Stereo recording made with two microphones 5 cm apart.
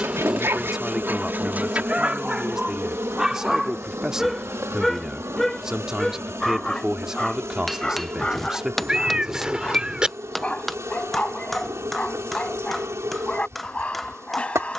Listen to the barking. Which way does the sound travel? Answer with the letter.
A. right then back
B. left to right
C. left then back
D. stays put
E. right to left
E.